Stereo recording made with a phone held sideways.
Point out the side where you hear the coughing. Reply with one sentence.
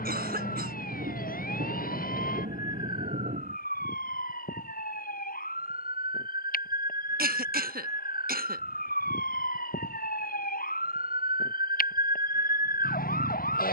In this clip you hear the coughing on the right.